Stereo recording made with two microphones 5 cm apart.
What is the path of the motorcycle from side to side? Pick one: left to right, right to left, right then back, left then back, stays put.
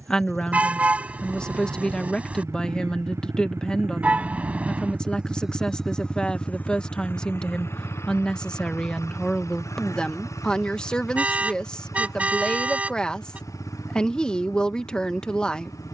right to left.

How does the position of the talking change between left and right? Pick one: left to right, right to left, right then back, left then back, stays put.
stays put.